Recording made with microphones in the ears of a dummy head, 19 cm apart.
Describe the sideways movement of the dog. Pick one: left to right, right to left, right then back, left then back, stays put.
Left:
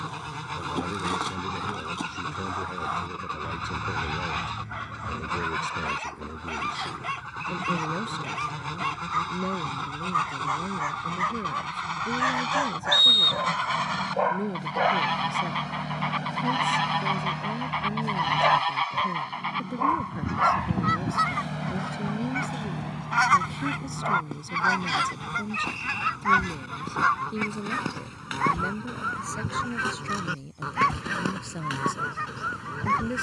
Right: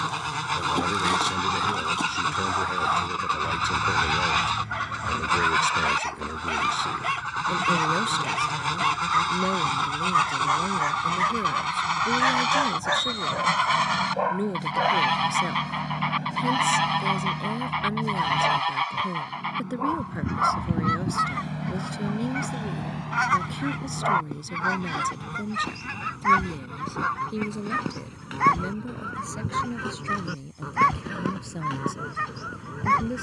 left then back.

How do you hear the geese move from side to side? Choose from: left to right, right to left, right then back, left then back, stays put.
right to left.